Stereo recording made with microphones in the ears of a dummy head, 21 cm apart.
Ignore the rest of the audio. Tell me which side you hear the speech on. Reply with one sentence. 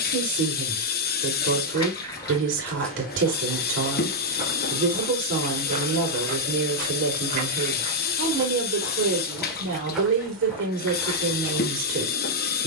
You can hear the speech on the right.